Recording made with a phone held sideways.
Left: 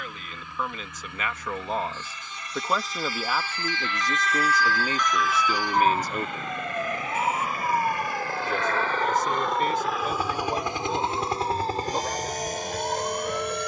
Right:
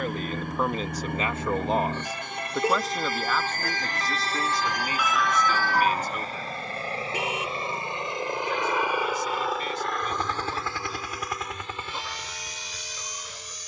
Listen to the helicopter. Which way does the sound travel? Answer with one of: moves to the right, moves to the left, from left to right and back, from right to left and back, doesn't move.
moves to the left.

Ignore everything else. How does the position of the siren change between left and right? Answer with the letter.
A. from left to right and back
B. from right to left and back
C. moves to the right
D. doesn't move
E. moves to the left
E.